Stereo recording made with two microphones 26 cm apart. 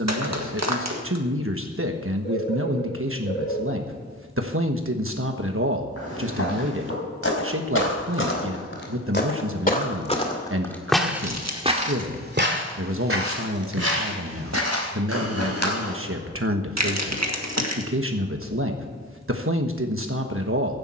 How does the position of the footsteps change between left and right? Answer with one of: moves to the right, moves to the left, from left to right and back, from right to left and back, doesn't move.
moves to the right.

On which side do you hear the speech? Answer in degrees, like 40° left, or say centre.
50° right.